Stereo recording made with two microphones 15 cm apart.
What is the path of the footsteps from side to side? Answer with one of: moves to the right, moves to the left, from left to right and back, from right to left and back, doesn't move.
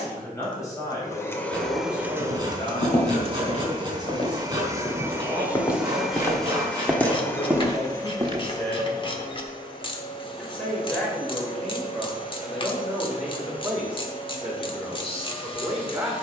moves to the right.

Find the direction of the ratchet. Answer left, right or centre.
left.